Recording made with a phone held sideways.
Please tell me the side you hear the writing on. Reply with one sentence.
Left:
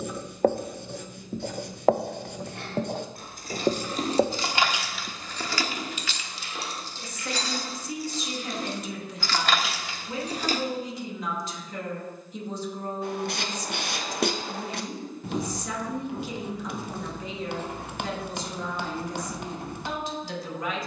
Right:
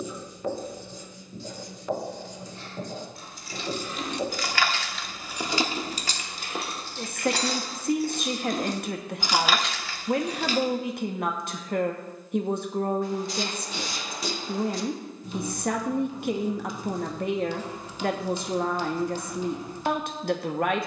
In this clip you hear the writing on the left.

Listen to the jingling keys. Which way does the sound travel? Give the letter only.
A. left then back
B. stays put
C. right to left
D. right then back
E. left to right
D.